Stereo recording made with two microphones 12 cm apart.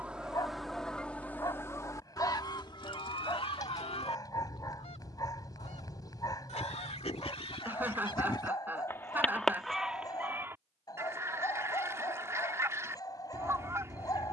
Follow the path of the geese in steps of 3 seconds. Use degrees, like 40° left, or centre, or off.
20° left, 60° left, 50° left, 10° right, 20° right.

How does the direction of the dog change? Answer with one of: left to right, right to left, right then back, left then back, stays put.
stays put.